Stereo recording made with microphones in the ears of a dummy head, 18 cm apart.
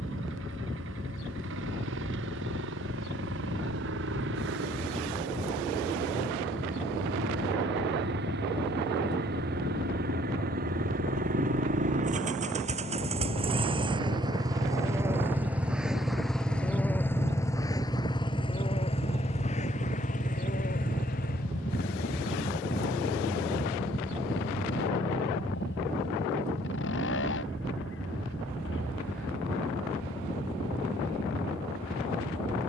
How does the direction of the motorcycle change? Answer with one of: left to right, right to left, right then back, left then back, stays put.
right to left.